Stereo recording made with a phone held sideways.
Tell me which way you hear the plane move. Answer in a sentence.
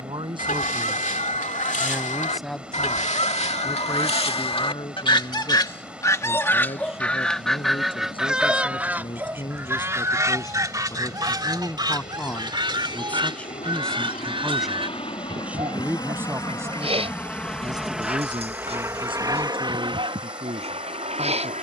You can hear the plane move from left to right.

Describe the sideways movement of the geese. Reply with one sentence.
You can hear the geese move from left to right.